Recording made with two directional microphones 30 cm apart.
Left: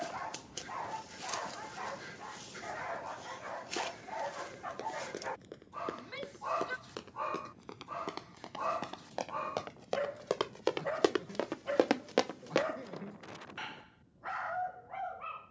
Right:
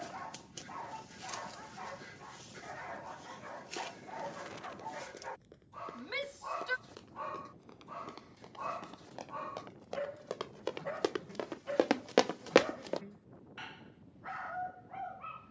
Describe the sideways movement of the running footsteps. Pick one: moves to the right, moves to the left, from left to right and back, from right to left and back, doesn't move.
moves to the right.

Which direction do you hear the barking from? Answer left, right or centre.
left.